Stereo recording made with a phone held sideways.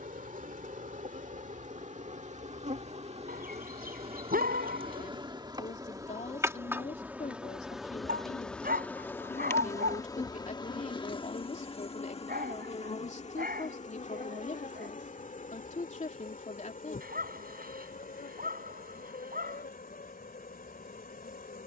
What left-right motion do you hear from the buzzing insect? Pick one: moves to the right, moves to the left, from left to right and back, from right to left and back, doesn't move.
moves to the left.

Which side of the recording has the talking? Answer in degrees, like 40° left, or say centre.
50° left.